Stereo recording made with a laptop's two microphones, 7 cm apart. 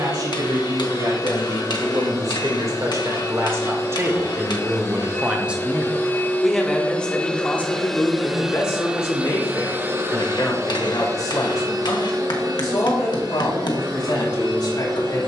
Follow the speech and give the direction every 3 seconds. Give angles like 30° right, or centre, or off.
60° right, 30° right, 20° left, 50° left, 70° left.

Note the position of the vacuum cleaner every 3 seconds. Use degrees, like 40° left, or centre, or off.
50° left, 40° left, 10° left, 40° right, 70° right.